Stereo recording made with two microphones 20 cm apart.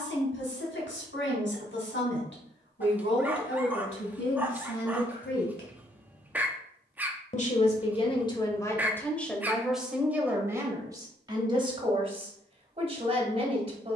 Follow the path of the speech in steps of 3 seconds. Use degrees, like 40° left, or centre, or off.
70° left, 70° left, 20° left, 10° right, 30° right.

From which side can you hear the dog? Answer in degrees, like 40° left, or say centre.
10° right.